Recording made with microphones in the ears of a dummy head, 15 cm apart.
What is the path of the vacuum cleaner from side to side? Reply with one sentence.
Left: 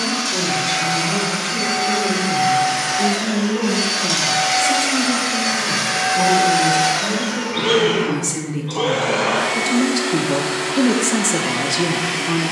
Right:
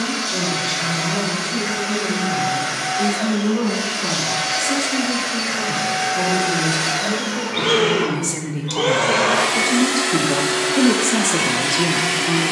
You can hear the vacuum cleaner go from the left side to the right.